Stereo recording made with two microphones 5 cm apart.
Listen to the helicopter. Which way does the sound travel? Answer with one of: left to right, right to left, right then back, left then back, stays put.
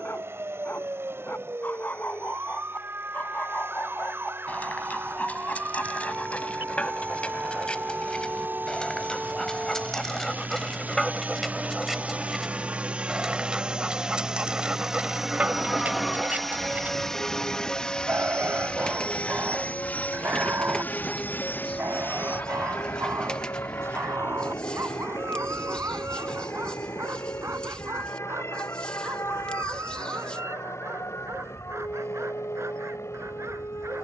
right to left.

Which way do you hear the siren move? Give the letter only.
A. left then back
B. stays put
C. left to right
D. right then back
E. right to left
E.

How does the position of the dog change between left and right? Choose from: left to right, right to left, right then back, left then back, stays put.
left to right.